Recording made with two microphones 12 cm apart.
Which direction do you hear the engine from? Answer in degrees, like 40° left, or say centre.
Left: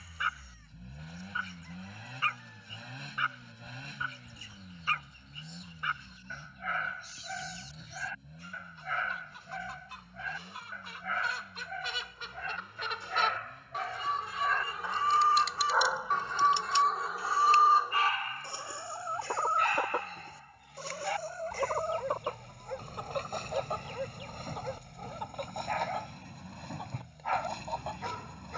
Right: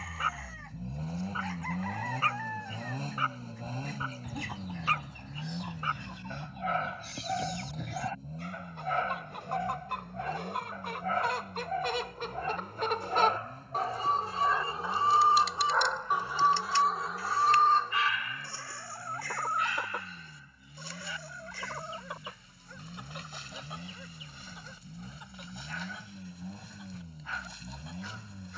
40° right.